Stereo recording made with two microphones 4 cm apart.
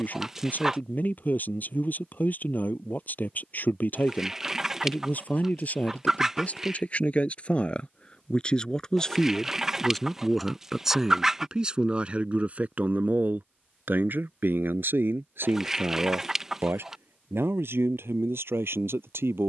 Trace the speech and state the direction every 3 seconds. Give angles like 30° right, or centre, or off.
50° left, 40° left, 30° left, centre, 50° right, 70° right, 80° right.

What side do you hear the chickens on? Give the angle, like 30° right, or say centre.
10° right.